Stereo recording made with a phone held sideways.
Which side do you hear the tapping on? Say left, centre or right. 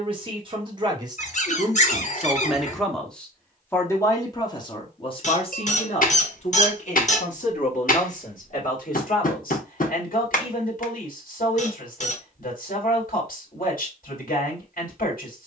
left.